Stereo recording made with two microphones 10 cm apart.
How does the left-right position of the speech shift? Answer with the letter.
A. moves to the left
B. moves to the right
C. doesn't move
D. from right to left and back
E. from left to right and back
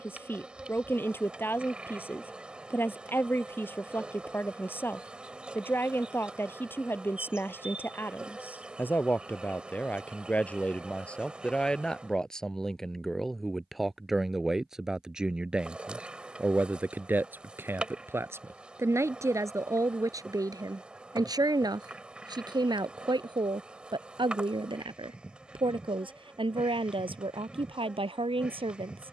B.